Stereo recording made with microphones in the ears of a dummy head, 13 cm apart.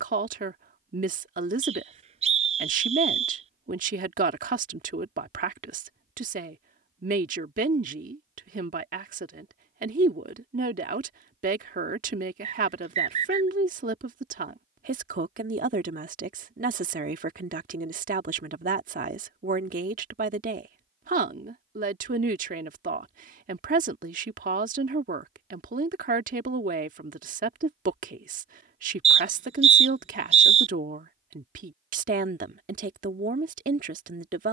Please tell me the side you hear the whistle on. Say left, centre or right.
right.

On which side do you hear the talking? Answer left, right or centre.
right.